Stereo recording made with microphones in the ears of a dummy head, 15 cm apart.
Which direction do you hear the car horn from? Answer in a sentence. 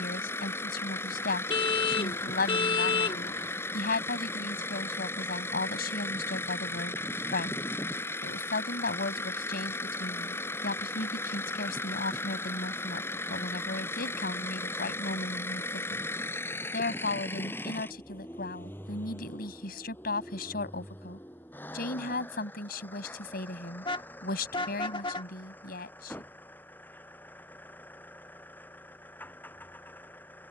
In this clip you hear the car horn on the left.